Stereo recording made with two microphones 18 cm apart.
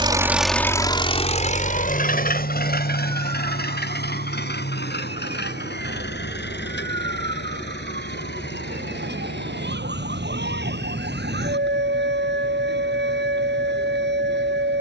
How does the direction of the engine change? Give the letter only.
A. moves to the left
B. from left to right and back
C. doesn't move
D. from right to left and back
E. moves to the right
A.